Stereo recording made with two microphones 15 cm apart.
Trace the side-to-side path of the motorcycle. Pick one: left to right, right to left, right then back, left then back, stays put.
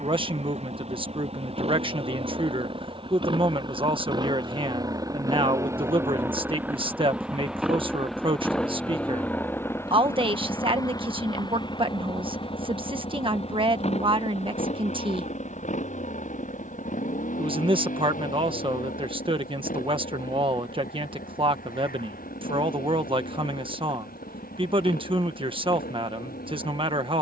right to left.